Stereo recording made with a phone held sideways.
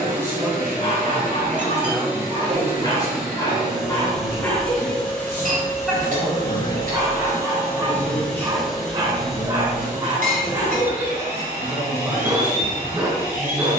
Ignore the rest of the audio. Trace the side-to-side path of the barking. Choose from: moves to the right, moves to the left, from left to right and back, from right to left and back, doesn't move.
moves to the right.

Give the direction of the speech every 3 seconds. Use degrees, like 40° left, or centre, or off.
centre, 40° left, 30° left, 10° right, 10° right.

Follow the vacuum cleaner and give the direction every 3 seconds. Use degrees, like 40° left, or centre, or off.
20° right, centre, 10° left, 10° right, 20° right.